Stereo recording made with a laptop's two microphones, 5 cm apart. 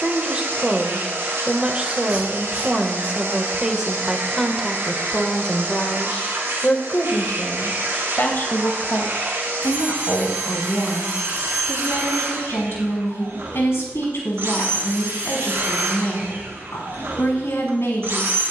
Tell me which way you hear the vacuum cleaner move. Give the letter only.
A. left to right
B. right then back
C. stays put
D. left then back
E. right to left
C.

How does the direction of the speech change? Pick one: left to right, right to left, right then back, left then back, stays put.
right to left.